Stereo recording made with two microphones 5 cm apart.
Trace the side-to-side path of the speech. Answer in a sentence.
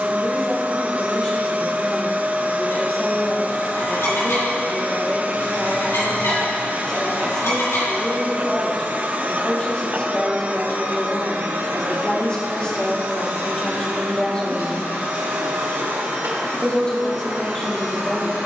In this clip you hear the speech stay put.